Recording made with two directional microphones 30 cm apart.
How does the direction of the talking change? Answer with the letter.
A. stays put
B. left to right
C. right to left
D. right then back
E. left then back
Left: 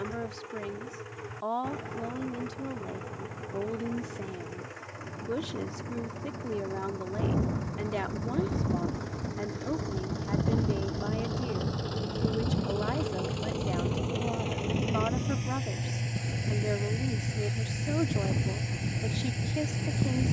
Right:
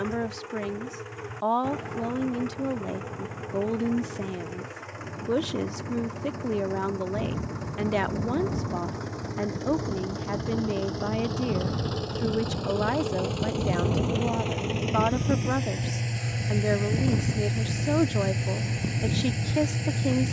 A.